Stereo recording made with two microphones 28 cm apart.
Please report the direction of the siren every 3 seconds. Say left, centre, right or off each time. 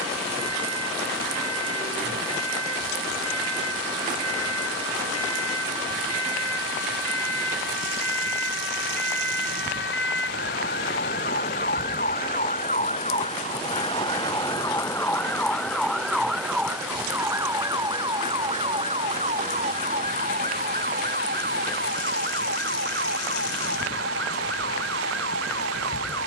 left, left, left, left, left, centre, right, right, right.